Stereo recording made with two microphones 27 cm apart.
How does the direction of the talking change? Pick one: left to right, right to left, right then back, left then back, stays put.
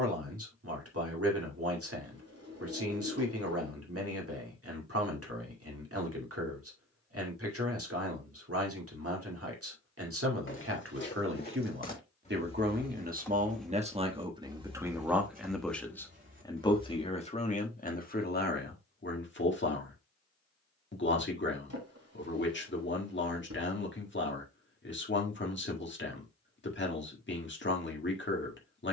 right to left.